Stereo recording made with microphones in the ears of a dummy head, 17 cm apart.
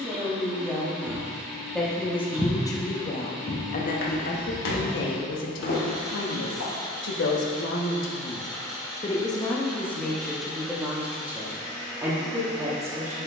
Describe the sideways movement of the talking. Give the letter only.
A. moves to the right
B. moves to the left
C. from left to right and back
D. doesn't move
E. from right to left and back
E.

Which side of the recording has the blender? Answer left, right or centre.
centre.